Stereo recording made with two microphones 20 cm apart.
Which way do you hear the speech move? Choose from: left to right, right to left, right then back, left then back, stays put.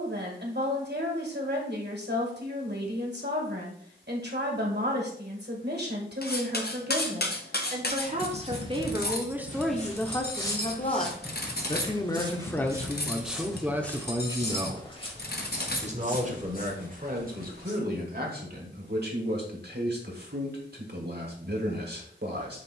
left then back.